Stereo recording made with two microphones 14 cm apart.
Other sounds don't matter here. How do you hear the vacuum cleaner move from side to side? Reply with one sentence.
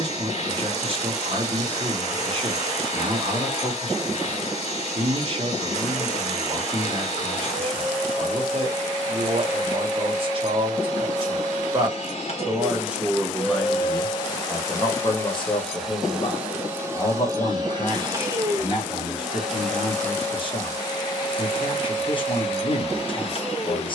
In this clip you hear the vacuum cleaner move from left to right and back again.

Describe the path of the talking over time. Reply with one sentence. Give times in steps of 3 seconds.
You can hear the talking on the right from 0 s, in the centre from 12 s and on the left from 15 s.